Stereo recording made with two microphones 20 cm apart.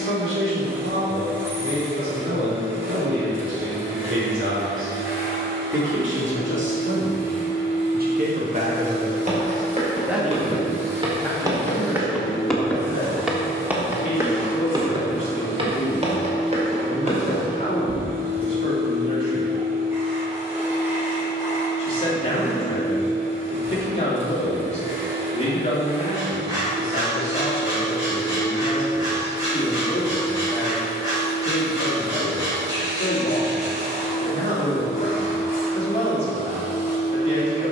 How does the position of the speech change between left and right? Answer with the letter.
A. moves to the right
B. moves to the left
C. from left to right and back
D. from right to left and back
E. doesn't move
B.